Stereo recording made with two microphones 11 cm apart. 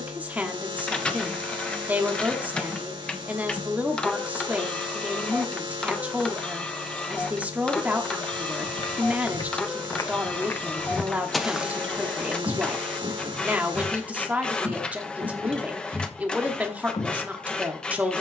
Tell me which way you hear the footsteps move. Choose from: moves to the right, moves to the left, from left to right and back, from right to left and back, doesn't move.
from left to right and back.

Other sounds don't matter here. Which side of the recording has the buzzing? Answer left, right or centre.
right.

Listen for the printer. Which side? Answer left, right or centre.
centre.